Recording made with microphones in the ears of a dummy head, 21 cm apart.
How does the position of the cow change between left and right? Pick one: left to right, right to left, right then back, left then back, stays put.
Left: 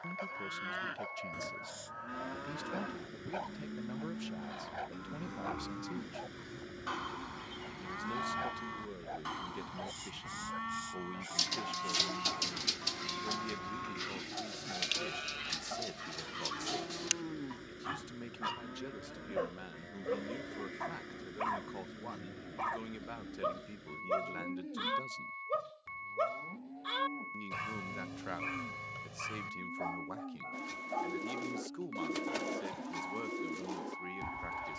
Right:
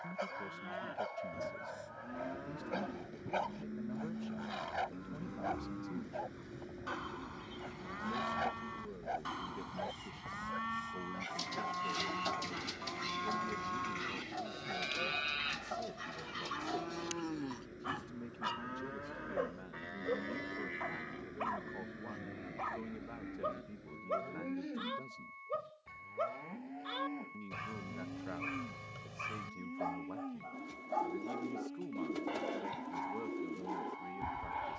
left to right.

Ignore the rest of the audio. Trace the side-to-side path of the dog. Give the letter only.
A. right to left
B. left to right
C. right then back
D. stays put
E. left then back
E.